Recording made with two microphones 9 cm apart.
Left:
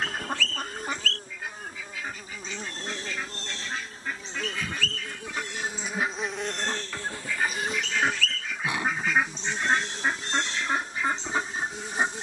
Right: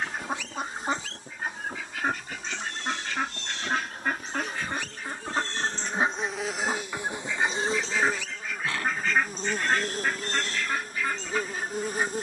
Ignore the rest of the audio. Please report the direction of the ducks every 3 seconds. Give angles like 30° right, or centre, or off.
40° right, 50° right, 10° right, 20° left.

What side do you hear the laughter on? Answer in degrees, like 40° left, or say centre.
20° left.